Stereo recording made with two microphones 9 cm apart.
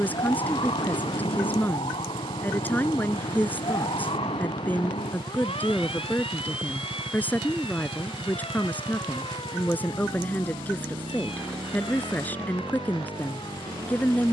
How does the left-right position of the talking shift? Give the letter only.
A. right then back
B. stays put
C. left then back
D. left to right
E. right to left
B.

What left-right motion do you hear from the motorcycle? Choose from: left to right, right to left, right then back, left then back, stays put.
stays put.